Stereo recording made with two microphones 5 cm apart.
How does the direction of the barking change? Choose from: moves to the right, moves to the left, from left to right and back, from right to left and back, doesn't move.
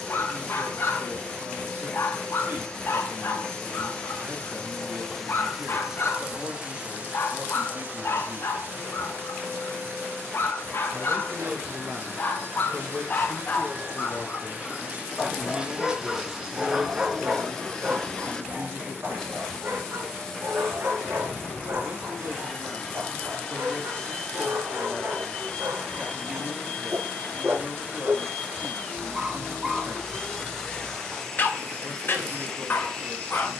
from left to right and back.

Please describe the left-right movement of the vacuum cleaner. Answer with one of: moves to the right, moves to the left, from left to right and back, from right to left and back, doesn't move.
from left to right and back.